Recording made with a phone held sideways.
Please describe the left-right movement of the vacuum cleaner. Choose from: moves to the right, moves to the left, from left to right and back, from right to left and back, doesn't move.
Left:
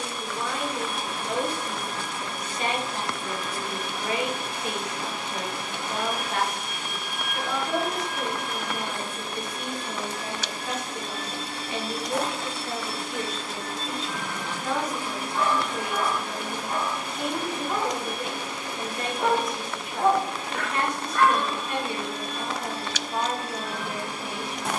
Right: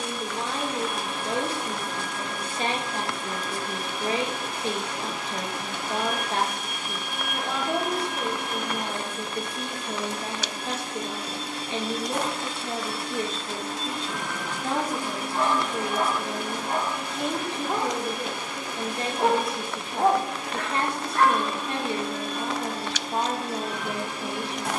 doesn't move.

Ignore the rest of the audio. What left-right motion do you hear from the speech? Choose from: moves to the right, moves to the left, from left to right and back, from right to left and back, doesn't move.
doesn't move.